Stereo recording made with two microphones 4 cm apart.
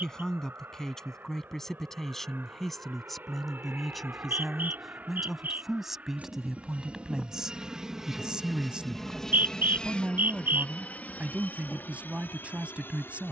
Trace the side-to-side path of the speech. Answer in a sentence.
In this clip you hear the speech move to the right.